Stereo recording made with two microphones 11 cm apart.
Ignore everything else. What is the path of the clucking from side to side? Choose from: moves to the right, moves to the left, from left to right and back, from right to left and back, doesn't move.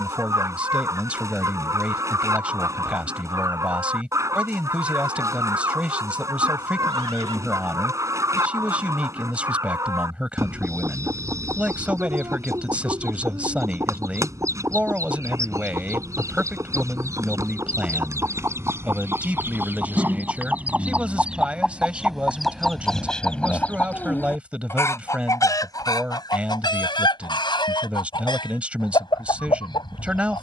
moves to the left.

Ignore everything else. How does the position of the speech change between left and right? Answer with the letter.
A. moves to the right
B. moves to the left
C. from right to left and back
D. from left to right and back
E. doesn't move
E.